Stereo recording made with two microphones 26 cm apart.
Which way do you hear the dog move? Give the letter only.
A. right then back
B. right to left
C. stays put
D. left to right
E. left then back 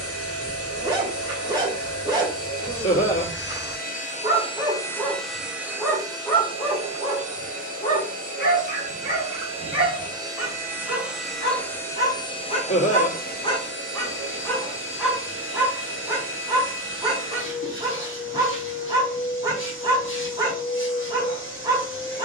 E.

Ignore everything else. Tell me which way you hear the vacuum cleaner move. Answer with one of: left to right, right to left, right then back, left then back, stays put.
right then back.